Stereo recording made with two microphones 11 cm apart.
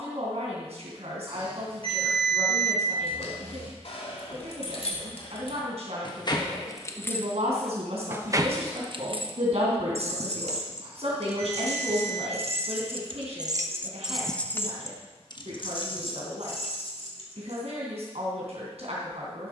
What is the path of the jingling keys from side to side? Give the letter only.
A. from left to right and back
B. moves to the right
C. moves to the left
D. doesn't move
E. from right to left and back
A.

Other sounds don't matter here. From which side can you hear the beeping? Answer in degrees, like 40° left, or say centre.
50° right.